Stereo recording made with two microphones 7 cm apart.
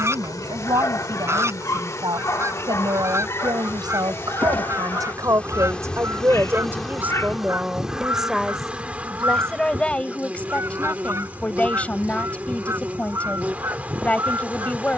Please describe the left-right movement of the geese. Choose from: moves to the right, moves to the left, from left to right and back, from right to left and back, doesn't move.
doesn't move.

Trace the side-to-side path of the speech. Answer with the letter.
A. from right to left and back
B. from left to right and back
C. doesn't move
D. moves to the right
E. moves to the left
E.